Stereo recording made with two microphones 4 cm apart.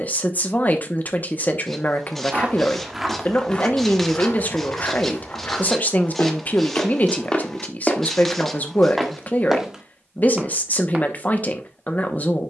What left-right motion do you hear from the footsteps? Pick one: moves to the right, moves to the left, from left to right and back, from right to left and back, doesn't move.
from right to left and back.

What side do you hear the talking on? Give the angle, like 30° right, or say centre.
40° left.